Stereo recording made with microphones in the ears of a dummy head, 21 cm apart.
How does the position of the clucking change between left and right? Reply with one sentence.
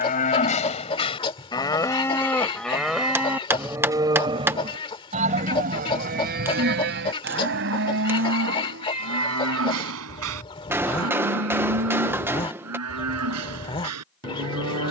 In this clip you hear the clucking stay put.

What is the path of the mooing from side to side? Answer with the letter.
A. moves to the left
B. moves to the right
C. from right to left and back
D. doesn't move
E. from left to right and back
B.